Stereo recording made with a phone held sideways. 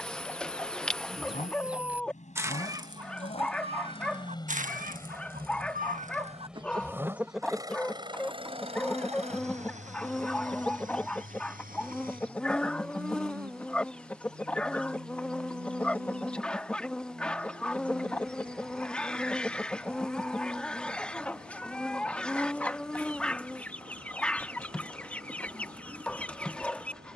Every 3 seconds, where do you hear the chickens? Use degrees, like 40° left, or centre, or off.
10° right, 50° right, 10° right, 10° left, 10° left, 10° left, 10° left, 10° left, 10° left.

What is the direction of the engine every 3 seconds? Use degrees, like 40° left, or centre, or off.
50° left, 20° left, 20° right, 50° right, 70° right, 70° right, 80° right, 80° right, 80° right.